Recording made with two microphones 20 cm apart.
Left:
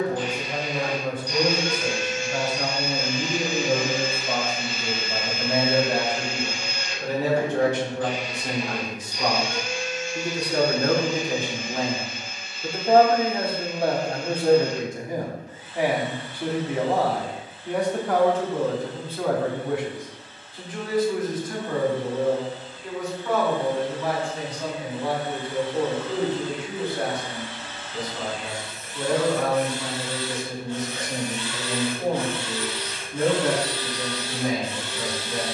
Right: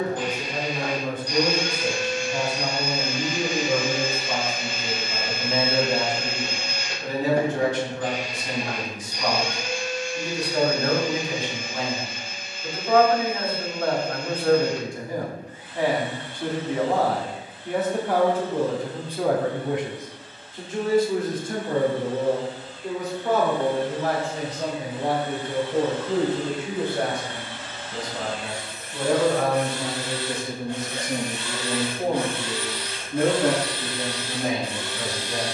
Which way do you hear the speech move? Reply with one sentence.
You can hear the speech go from the left side to the right.